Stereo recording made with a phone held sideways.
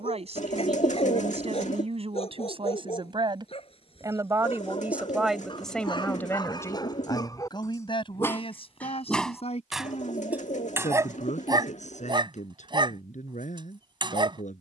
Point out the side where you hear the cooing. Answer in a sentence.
In this clip you hear the cooing on the left.